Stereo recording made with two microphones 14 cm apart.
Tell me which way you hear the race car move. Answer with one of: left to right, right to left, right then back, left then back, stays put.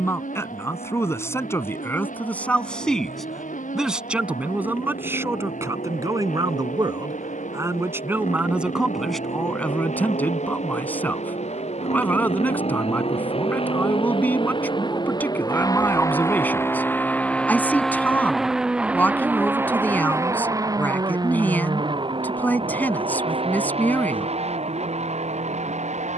left to right.